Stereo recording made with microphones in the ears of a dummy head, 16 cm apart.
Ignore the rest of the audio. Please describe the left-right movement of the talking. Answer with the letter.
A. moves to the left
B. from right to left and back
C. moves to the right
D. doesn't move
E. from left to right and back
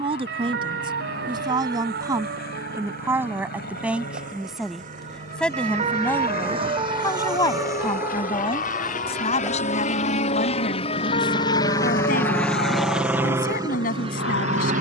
A.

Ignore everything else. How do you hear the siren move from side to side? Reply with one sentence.
In this clip you hear the siren move to the left.